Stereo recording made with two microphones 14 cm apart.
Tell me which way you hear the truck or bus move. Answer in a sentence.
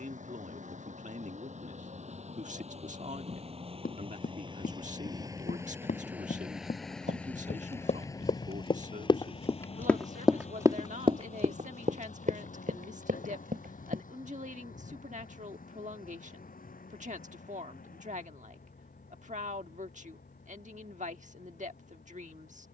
You can hear the truck or bus move from right to left.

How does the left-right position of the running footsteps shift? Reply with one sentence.
You can hear the running footsteps move from left to right.